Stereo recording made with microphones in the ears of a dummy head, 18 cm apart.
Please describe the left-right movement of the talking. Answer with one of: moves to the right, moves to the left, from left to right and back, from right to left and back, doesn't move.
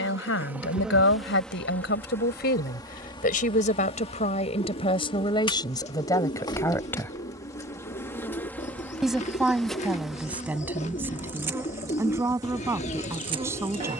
moves to the right.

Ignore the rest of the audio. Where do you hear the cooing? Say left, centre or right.
left.